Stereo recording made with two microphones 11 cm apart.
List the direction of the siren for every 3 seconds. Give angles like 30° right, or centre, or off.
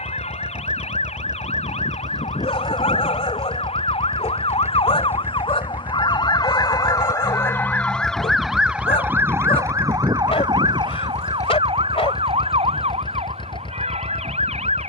70° left, 60° left, 20° left, 40° right, 60° right.